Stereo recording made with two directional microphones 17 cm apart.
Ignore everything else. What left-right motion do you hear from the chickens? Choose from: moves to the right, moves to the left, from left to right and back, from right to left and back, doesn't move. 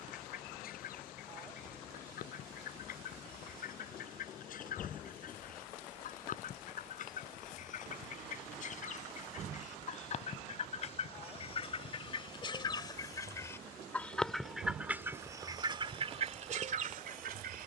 moves to the right.